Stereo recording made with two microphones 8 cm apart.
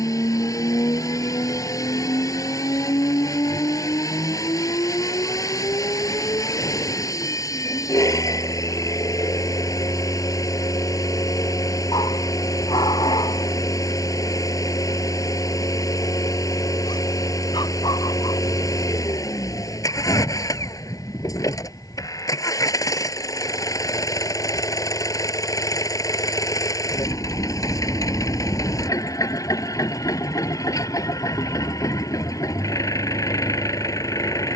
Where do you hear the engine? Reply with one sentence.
In this clip you hear the engine on the left.